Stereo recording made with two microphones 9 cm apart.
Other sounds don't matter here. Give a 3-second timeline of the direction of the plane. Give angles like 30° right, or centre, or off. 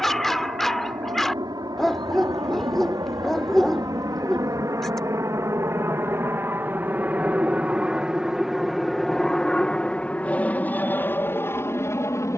60° right, 40° right, 20° right, 20° left.